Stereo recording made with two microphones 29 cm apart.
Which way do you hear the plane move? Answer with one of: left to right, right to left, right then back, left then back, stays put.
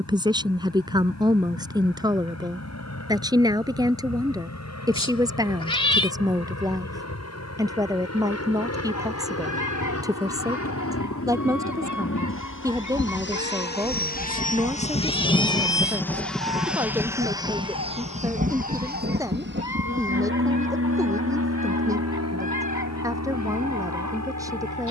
left to right.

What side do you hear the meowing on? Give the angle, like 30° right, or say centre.
20° left.